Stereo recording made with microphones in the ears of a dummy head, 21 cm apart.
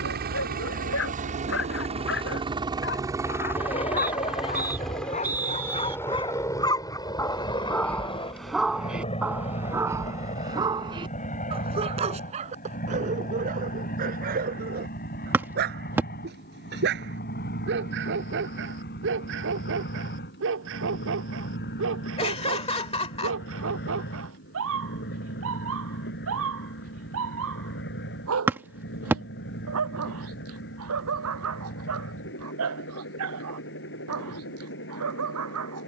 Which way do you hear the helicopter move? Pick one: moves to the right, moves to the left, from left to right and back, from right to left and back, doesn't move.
moves to the left.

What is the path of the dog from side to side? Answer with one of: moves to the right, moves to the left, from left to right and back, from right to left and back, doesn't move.
moves to the right.